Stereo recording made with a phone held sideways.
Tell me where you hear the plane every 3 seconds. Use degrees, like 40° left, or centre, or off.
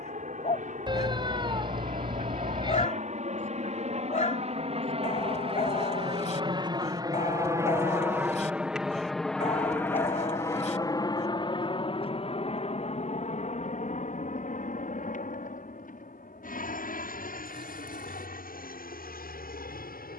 60° right, 50° right, 20° right, 20° left, 50° left, 60° left, 70° left.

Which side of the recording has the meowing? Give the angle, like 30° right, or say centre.
30° right.